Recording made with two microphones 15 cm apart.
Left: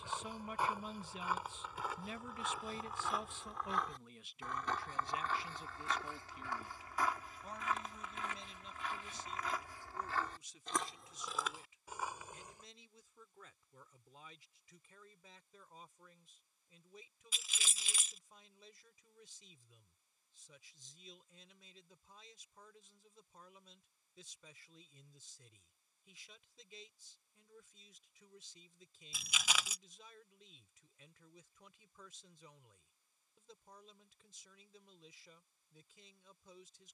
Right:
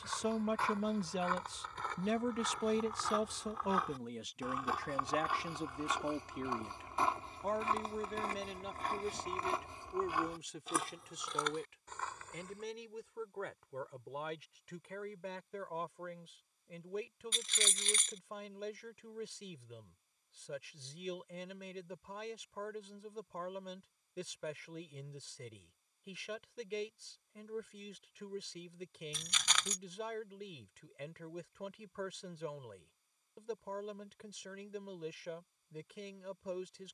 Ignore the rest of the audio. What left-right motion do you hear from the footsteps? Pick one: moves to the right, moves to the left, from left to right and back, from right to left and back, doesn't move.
from left to right and back.